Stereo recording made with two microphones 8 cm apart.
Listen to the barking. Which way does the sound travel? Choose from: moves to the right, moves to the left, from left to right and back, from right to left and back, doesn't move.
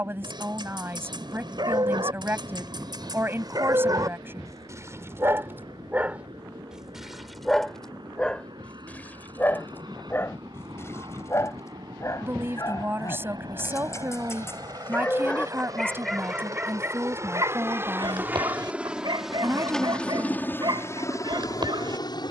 from right to left and back.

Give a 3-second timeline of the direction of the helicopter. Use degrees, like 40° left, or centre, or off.
70° right, 70° right, 60° right, 60° right, 50° right, 40° right, centre, 40° left.